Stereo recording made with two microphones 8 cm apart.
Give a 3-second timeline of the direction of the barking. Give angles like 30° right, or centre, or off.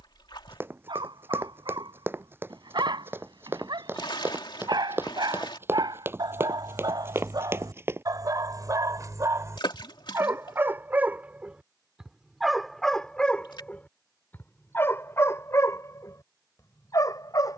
80° right, 70° right, 60° right, 30° right, 10° left, 40° left.